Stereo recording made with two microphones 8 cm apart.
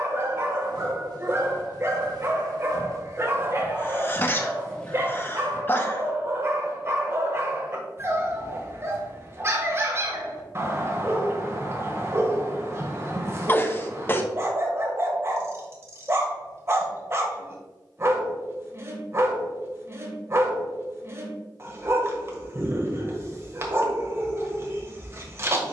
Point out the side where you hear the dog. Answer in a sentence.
In this clip you hear the dog on the right.